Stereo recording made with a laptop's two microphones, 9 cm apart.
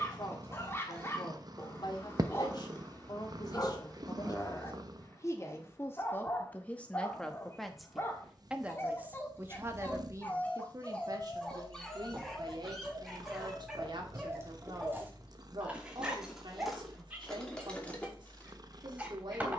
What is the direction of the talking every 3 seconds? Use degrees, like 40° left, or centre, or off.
50° left, 40° left, centre, 40° right, 60° right, 60° right, 60° right.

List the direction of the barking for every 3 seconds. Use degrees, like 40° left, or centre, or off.
30° left, 30° left, 30° left, 20° left, centre, 10° right, 20° right.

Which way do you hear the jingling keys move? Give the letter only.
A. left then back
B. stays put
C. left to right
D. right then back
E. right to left
E.